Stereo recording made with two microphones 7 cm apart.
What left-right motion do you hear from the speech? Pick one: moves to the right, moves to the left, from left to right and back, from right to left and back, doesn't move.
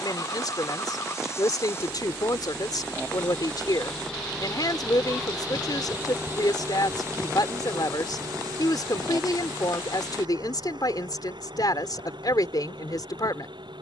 doesn't move.